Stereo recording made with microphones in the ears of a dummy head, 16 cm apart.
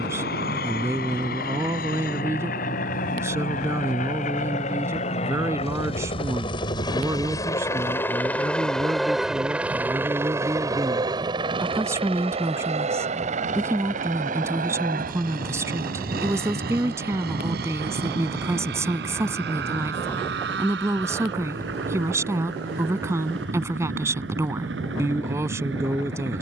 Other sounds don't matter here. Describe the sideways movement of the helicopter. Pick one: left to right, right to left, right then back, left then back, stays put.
left to right.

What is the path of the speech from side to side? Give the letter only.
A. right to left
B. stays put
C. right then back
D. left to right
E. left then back
B.